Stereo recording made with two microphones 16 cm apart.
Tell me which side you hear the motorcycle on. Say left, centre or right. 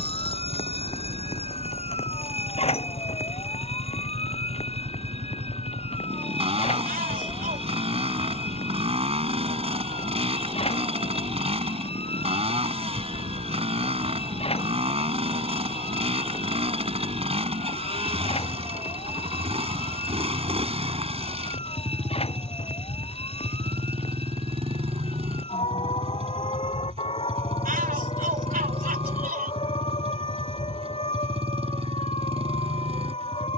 right.